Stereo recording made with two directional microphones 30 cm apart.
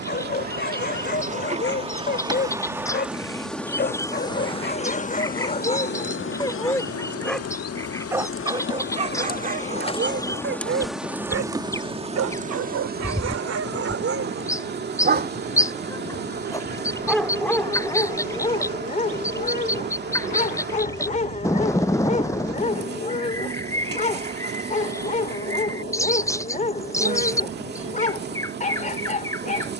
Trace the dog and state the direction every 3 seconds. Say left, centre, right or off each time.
left, left, centre, right, right, centre, left, left, left, left.